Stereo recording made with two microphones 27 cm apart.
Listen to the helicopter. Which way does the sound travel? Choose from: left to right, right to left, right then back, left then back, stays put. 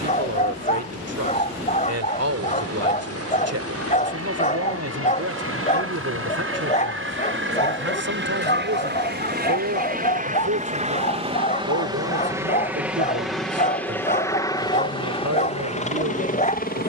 right to left.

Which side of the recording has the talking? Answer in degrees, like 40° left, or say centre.
70° right.